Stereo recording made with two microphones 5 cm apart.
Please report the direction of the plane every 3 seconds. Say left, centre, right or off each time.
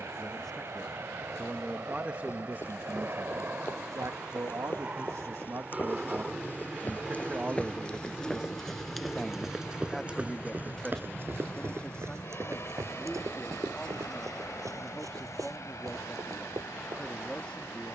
right, right, centre, left, left, left.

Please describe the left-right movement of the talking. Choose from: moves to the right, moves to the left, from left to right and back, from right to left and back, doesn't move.
from left to right and back.